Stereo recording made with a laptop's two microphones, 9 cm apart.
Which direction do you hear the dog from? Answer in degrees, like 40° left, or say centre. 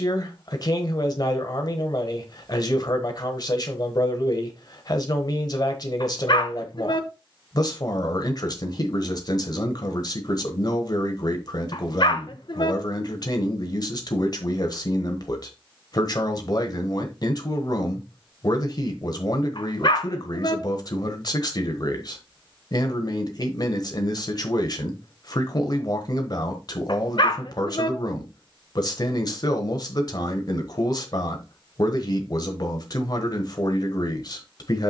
60° left.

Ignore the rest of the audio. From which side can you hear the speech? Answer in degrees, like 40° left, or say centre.
50° left.